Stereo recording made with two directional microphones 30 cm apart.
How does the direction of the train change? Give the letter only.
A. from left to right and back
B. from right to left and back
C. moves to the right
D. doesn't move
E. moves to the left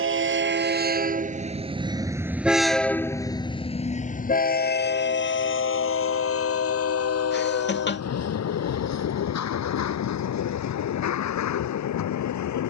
E.